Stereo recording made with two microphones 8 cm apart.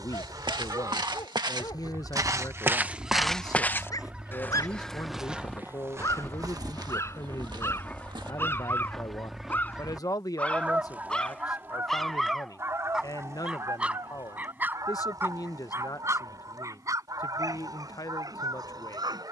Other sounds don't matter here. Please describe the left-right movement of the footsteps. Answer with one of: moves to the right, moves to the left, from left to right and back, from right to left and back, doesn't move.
from right to left and back.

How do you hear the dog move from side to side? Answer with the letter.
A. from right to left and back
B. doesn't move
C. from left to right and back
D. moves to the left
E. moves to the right
E.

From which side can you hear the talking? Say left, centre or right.
left.